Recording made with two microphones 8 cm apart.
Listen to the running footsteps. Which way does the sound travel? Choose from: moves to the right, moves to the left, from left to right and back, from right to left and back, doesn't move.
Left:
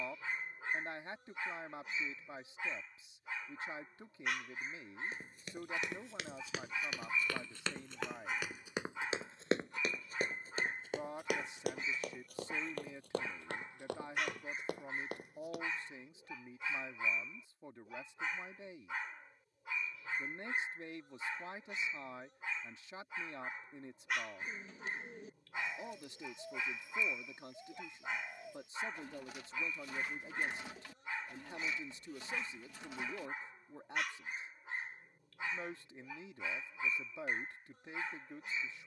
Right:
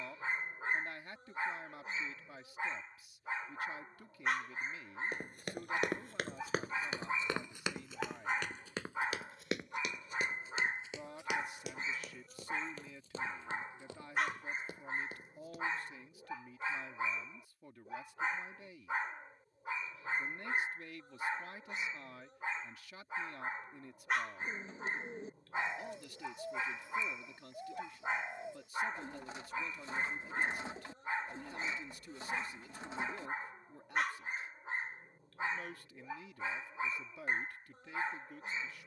moves to the left.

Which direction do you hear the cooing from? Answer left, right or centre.
right.